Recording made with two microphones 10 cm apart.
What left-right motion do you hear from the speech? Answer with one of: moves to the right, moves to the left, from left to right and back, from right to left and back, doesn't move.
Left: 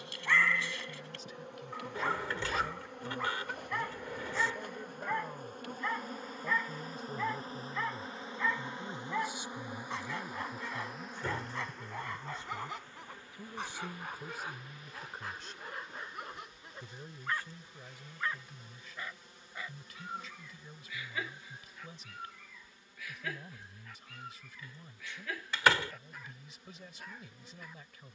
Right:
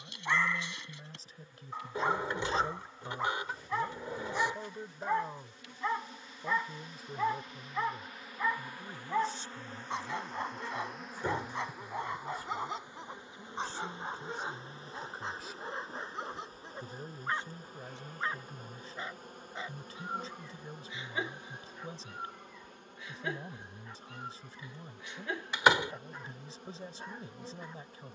from right to left and back.